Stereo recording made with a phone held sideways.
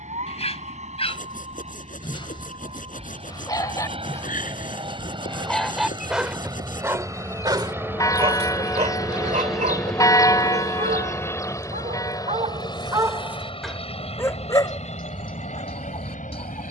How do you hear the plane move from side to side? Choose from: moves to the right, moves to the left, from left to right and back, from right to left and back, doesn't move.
moves to the left.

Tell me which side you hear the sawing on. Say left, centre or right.
left.